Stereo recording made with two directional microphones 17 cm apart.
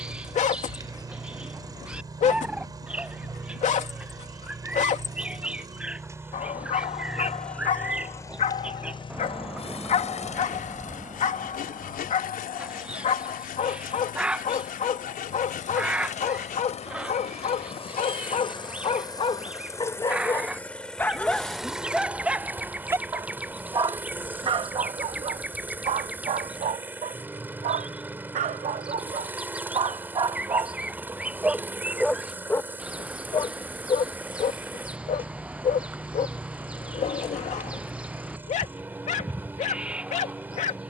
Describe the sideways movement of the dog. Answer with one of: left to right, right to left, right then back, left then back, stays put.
right then back.